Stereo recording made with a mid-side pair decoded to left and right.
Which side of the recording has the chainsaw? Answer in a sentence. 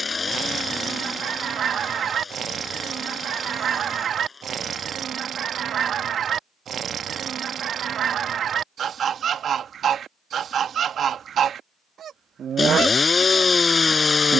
In this clip you hear the chainsaw on the left.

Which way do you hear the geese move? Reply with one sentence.
You can hear the geese stay put.